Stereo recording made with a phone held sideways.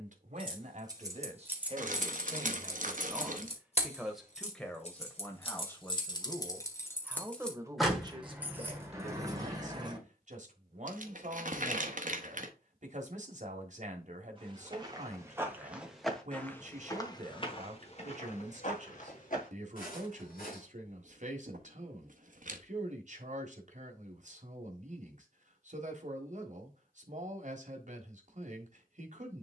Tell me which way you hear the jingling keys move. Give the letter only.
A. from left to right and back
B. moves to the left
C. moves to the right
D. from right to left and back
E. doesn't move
D.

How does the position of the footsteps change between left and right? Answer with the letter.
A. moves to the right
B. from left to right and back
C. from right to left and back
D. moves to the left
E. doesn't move
D.